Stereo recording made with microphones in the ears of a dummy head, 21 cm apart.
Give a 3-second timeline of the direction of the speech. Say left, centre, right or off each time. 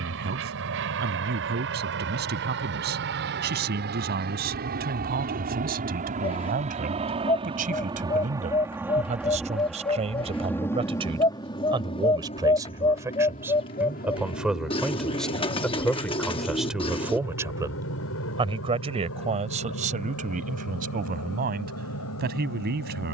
right, right, right, right, centre, centre, right, right.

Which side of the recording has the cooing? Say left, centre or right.
left.